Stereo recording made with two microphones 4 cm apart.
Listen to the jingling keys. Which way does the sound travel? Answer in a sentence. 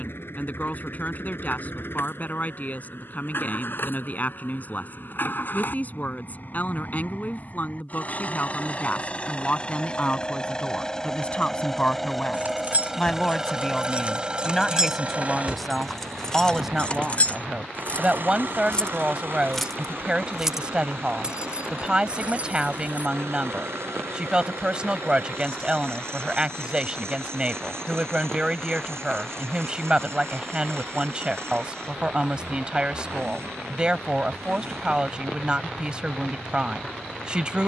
You can hear the jingling keys go left and come back.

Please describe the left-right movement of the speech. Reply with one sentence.
In this clip you hear the speech travel towards the right.